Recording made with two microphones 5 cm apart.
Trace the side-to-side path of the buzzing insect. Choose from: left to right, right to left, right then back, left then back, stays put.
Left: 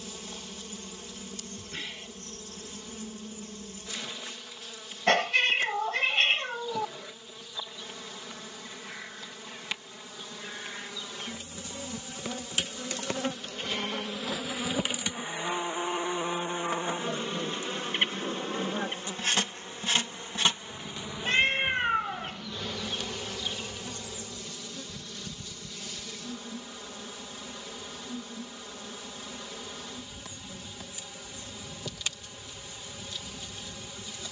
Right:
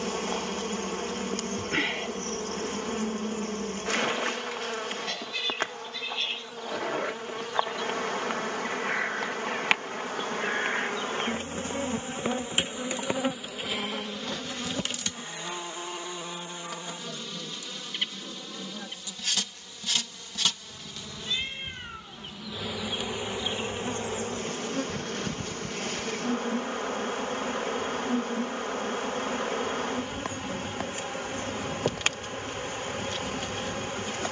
left then back.